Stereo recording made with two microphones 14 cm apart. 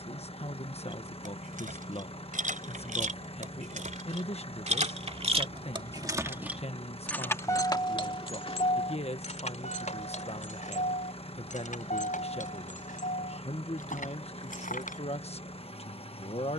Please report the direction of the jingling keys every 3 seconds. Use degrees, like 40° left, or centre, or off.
80° right, 60° right, 20° left, 60° left, 70° left, off.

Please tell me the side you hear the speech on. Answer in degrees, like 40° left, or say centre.
50° left.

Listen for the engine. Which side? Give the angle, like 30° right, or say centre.
50° left.